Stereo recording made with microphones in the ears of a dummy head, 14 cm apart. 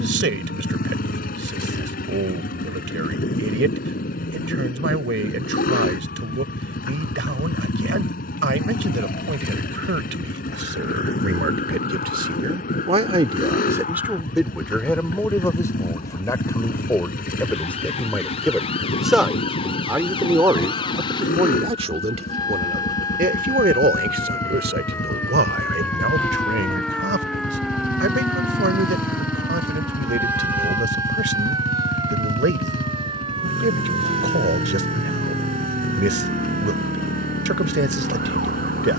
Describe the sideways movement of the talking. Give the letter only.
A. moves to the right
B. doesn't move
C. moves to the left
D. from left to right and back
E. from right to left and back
E.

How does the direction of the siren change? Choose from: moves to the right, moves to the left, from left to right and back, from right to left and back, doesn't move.
moves to the right.